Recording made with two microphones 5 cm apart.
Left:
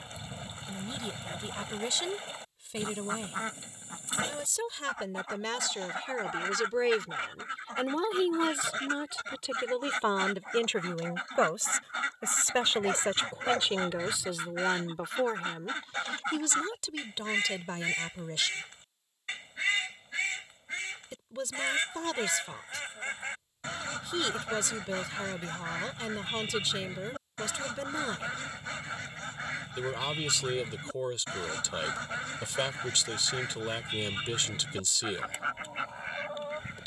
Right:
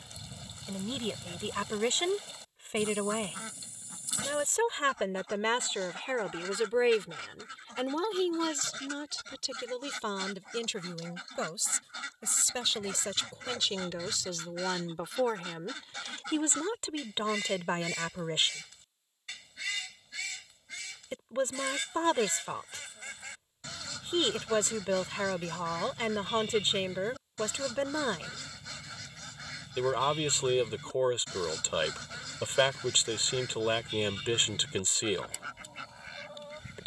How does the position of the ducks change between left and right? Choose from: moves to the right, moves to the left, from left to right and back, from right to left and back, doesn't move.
doesn't move.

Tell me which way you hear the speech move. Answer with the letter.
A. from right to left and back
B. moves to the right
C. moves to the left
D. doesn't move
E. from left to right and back
A.